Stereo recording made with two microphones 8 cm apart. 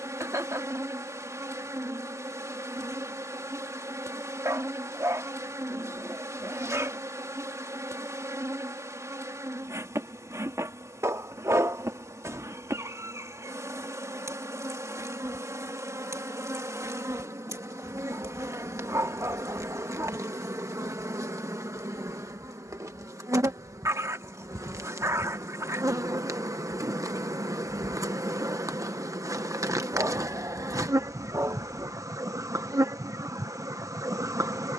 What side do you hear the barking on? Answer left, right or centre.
right.